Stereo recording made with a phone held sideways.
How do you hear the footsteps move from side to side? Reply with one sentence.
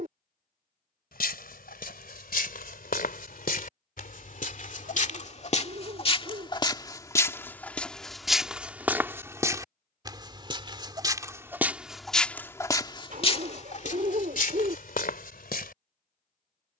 You can hear the footsteps move from left to right and back again.